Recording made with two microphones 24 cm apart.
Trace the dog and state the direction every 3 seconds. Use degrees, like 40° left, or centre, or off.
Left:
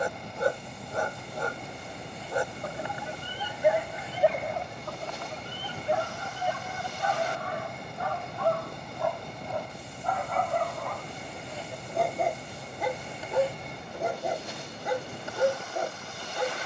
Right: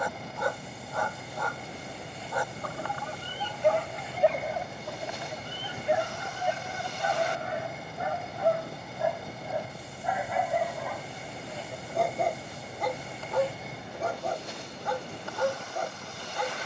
30° left, centre, 20° right, 10° right, 10° left, 20° left.